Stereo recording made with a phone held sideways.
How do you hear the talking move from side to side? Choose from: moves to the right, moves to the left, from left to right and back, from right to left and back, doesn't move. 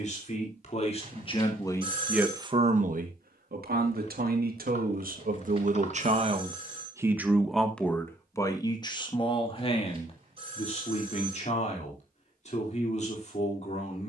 from left to right and back.